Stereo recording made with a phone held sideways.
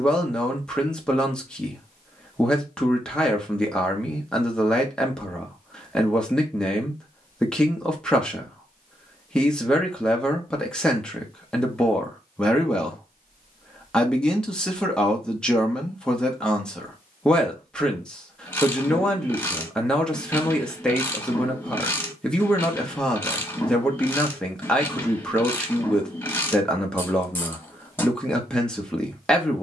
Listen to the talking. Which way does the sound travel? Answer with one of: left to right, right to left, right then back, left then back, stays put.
stays put.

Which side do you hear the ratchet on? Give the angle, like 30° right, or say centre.
10° left.